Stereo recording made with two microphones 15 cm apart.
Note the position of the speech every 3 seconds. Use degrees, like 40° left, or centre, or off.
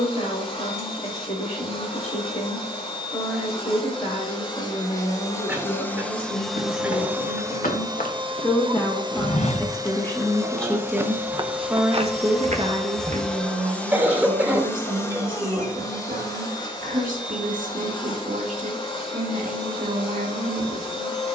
50° left, 50° left, 40° left, 10° left, 50° right, 70° right, 70° right.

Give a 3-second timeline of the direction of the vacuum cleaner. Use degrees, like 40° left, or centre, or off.
40° left, 30° left, 20° right, 20° right, 10° left, 30° left, 30° left.